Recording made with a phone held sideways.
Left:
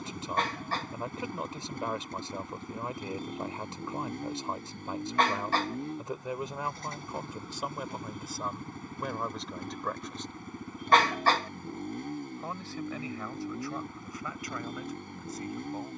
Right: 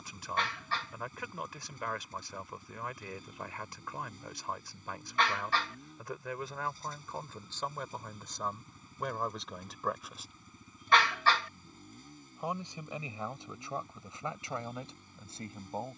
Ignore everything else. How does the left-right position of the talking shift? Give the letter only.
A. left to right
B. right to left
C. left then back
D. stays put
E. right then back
A.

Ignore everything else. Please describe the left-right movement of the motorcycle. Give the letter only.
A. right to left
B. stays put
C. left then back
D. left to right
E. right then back
B.